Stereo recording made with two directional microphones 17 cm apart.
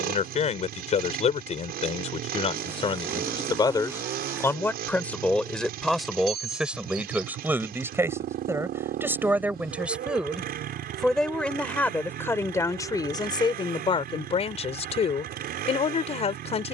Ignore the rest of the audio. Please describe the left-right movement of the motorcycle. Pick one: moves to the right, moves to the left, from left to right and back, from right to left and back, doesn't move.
doesn't move.